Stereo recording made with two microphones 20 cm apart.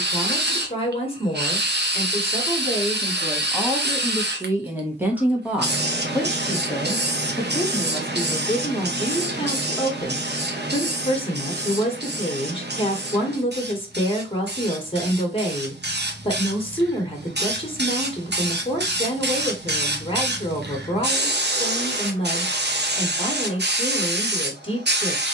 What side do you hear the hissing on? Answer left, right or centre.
right.